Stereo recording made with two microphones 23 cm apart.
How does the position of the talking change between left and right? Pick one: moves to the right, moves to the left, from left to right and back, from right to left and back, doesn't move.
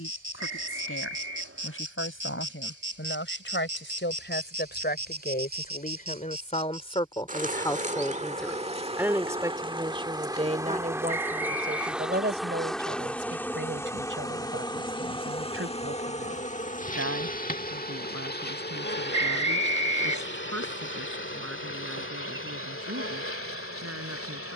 moves to the right.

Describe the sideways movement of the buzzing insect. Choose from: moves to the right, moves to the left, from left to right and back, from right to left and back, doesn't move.
moves to the left.